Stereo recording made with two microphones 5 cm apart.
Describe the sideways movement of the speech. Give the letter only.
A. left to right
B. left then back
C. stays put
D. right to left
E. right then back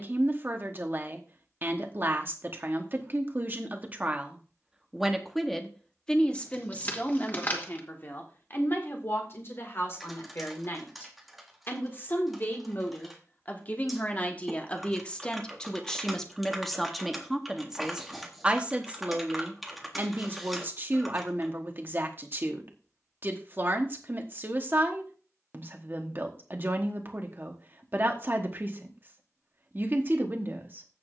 B.